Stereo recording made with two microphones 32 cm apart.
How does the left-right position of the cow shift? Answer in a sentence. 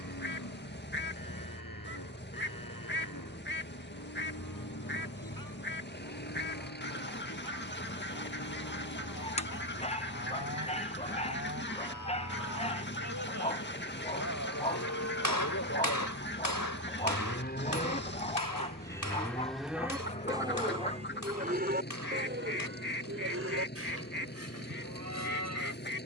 You can hear the cow travel towards the right.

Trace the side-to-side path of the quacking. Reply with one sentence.
In this clip you hear the quacking stay in one place.